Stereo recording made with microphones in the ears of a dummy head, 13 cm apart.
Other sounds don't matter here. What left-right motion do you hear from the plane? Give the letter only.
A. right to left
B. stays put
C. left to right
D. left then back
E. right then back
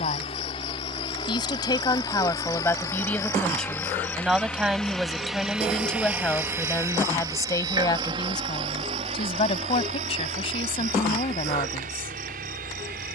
C.